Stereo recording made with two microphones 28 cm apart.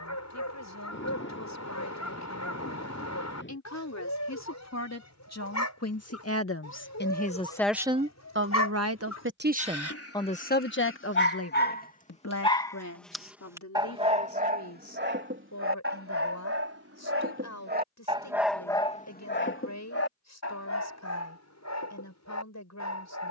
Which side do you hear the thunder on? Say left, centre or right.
left.